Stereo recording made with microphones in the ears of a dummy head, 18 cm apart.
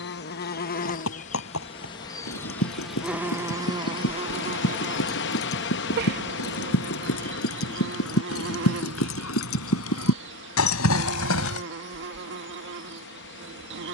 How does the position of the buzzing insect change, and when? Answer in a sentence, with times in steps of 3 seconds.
In this clip you hear the buzzing insect on the left from 0 s and on the right from 3 s.